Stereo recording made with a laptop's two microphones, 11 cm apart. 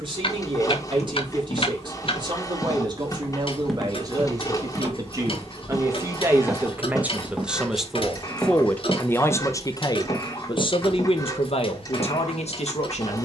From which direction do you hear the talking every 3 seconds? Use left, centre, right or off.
right, right, centre, left, left.